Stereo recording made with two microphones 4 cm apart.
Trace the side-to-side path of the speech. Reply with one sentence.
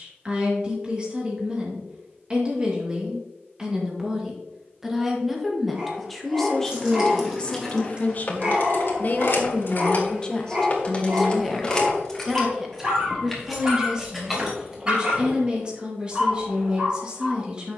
You can hear the speech move from right to left and back again.